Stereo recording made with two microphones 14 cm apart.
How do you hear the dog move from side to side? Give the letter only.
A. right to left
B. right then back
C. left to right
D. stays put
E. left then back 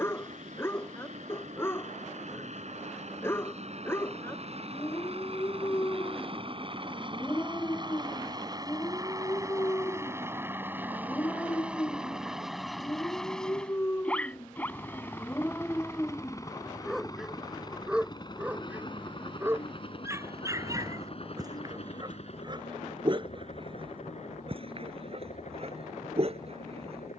C.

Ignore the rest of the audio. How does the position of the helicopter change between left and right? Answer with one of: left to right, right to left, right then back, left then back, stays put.
right to left.